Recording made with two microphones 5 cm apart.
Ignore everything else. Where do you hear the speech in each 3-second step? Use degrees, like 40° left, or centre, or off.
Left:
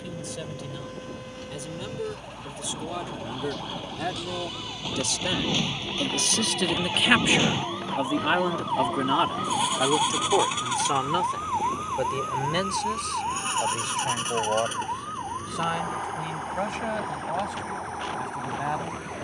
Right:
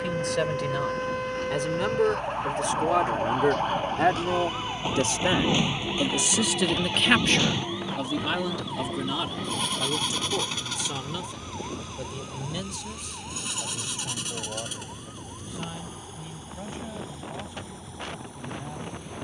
60° right, 40° right, 10° left, 50° left, 70° left, 80° left, 80° left.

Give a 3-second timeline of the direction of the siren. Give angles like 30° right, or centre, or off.
60° right, 30° right, 20° left, 50° left, 70° left, 70° left, 80° left.